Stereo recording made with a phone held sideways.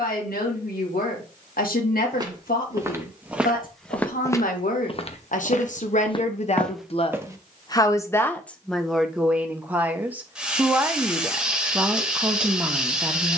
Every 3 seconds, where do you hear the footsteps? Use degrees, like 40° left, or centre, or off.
20° right, 20° left, 10° left, off, off.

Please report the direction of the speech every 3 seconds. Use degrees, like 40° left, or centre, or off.
80° left, 70° left, 30° left, 10° right, 10° right.